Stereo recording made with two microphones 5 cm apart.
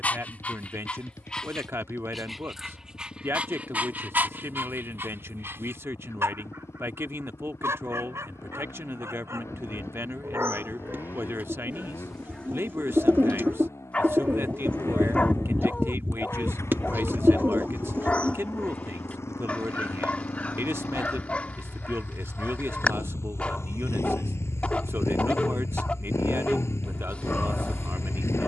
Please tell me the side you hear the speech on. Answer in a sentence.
You can hear the speech on the right.